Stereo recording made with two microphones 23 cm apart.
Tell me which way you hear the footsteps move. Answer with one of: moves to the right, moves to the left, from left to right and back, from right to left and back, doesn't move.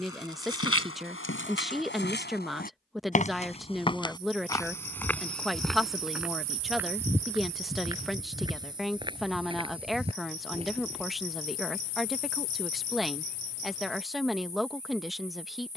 moves to the right.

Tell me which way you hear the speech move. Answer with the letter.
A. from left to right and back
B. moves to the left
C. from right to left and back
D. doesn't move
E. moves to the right
D.